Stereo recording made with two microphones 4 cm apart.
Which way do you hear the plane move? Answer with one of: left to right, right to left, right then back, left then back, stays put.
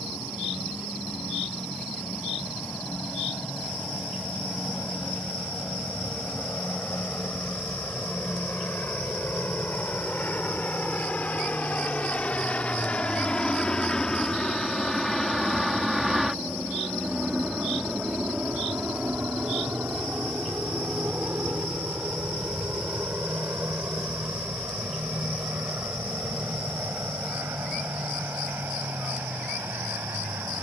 left to right.